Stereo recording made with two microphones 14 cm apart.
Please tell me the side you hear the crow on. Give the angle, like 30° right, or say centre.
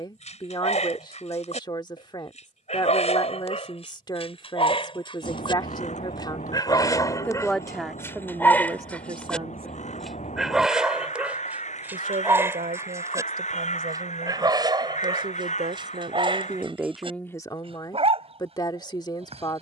50° left.